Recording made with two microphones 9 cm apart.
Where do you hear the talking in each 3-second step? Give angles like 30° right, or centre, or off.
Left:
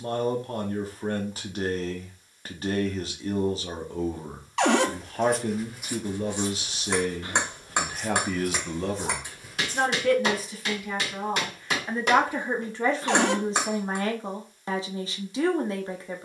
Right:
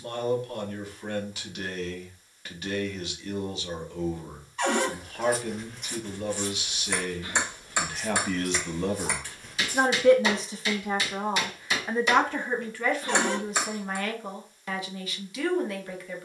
30° left, 30° left, 20° left, 20° right, 20° left, 30° left.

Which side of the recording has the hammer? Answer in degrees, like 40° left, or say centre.
50° left.